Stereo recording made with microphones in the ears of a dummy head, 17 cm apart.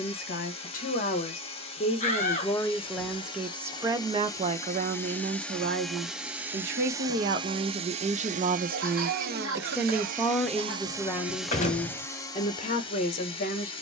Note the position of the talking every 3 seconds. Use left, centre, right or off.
left, right, right, centre, left.